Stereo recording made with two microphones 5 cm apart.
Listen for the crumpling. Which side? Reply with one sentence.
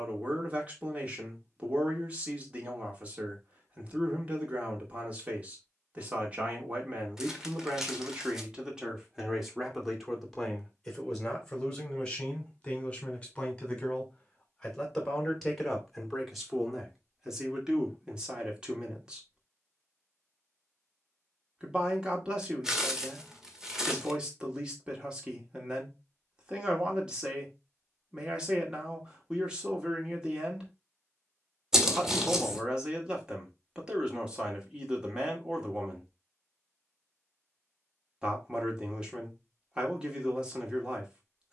In this clip you hear the crumpling in the centre.